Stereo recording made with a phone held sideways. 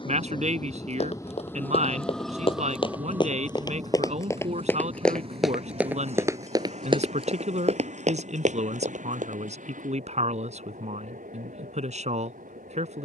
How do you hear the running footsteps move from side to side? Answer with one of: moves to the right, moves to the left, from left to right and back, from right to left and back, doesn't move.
moves to the right.